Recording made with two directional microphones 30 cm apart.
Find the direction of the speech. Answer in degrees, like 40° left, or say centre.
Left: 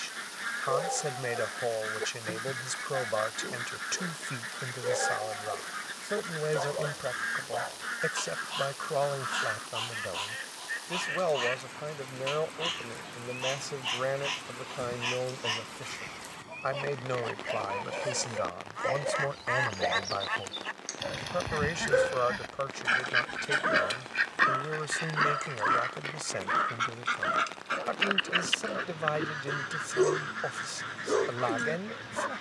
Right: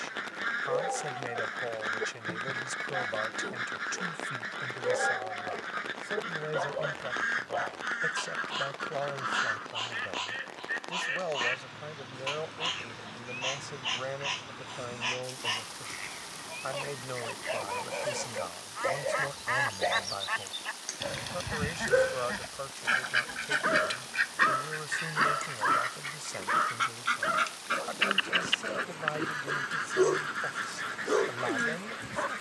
40° left.